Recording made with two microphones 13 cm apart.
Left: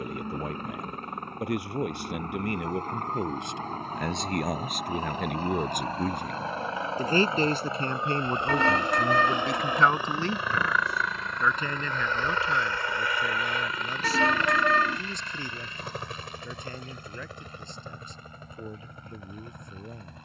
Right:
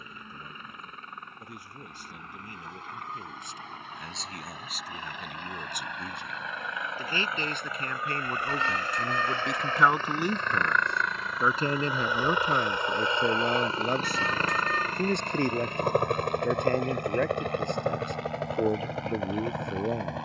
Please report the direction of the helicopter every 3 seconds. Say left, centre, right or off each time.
left, left, left, centre, right, right, right.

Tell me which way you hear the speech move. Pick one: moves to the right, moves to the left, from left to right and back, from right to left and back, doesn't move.
moves to the right.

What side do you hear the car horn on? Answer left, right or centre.
left.